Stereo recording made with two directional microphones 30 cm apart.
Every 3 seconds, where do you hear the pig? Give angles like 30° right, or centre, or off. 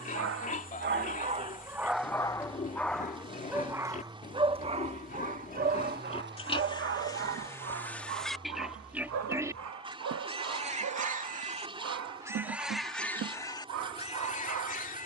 30° left, 20° left, 10° left, 20° right, 10° left.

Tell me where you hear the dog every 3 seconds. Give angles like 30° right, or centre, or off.
20° right, 20° right, 40° right, 60° right, 60° right.